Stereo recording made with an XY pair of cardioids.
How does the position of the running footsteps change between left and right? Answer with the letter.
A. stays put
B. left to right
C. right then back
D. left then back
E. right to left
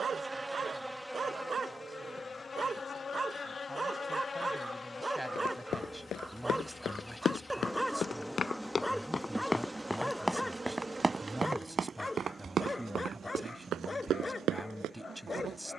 B.